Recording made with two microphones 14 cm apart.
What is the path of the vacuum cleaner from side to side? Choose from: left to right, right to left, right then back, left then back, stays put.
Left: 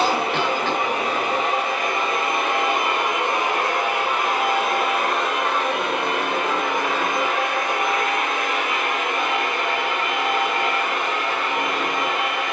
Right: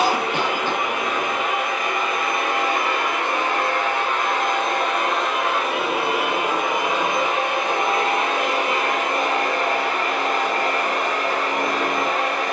left to right.